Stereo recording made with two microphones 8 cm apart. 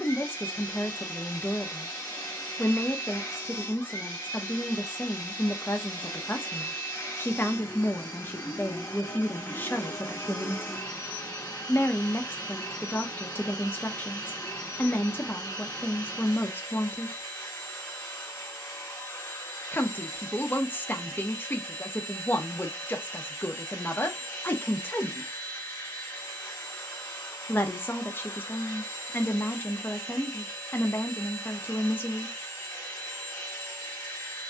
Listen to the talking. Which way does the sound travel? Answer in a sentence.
In this clip you hear the talking stay in one place.